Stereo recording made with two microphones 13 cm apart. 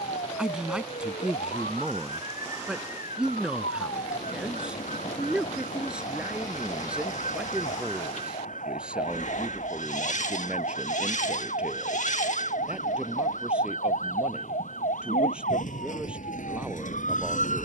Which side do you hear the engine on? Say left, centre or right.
left.